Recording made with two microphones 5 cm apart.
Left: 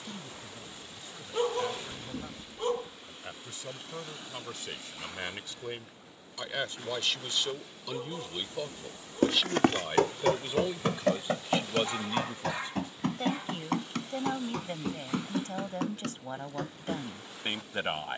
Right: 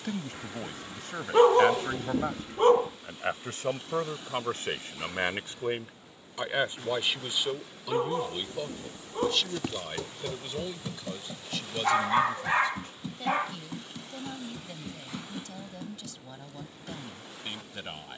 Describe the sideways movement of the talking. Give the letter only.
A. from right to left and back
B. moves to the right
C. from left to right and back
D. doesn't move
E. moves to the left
E.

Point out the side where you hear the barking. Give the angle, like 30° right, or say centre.
50° right.